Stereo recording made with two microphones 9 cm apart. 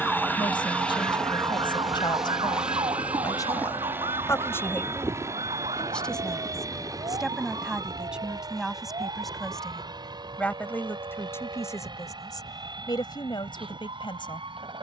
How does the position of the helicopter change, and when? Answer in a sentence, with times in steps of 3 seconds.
You can hear the helicopter in the centre from 0 s and on the right from 3 s.